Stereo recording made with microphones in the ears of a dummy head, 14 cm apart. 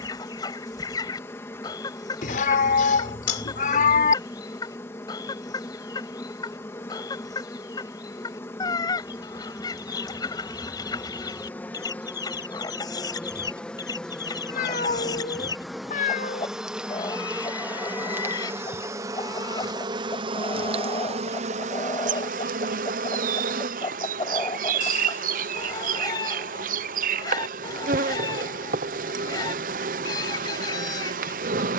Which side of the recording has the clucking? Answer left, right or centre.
left.